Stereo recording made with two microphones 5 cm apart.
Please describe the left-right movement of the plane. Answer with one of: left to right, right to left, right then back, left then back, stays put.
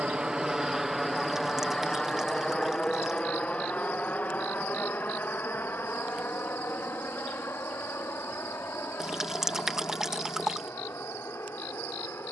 right to left.